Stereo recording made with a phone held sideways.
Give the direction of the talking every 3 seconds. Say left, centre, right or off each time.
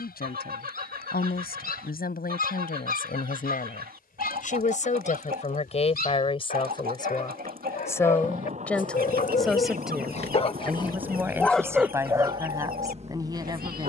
left, left, left, centre, right.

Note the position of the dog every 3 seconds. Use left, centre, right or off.
left, left, left, left, right.